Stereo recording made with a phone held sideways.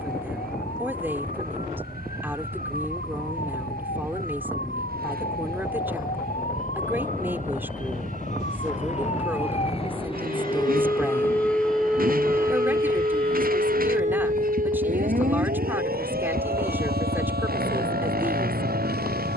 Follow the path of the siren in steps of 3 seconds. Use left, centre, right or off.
left, left, left, left, right, right, right.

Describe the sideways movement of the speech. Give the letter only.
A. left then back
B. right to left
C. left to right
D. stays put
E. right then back
D.